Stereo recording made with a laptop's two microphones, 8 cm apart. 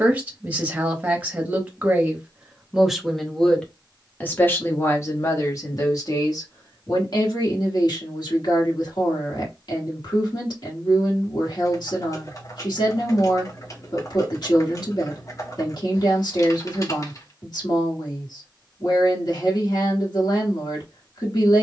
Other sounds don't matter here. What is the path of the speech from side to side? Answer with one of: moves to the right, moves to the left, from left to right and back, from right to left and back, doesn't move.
moves to the left.